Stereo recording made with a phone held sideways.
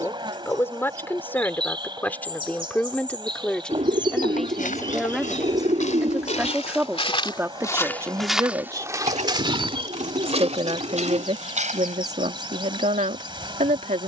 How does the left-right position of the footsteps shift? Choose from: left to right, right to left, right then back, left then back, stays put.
left to right.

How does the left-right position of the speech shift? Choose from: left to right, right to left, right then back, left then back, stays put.
left to right.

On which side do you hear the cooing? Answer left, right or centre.
right.